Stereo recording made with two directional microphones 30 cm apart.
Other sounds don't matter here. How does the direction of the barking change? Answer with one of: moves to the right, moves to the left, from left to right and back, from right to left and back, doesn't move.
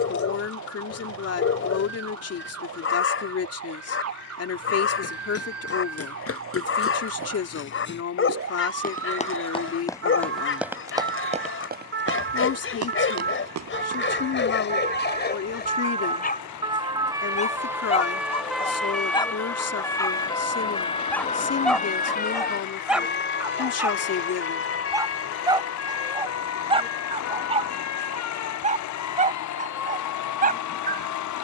moves to the right.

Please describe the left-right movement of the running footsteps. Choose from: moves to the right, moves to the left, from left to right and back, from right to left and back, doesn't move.
moves to the right.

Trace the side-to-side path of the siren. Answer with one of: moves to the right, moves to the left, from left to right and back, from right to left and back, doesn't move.
moves to the left.